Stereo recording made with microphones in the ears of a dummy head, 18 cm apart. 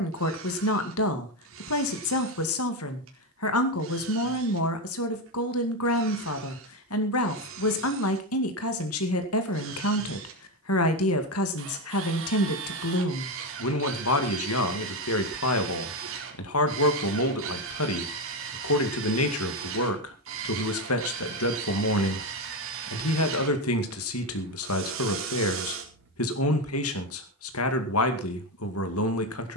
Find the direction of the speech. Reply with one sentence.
In this clip you hear the speech on the left.